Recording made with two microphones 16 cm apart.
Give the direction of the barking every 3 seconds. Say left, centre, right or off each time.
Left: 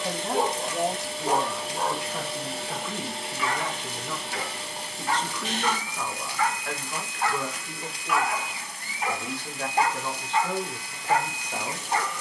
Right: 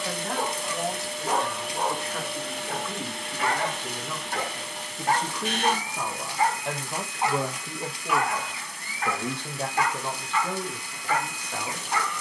centre, right, centre, left.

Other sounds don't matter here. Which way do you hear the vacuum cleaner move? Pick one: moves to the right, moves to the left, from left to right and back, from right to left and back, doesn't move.
doesn't move.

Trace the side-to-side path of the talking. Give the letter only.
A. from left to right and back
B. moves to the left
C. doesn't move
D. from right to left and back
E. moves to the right
A.